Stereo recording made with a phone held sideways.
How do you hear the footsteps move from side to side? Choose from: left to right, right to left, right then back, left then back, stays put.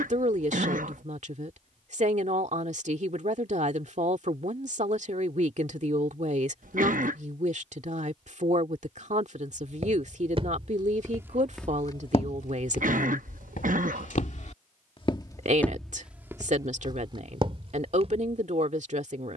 left then back.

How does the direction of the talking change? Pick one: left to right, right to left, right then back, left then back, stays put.
stays put.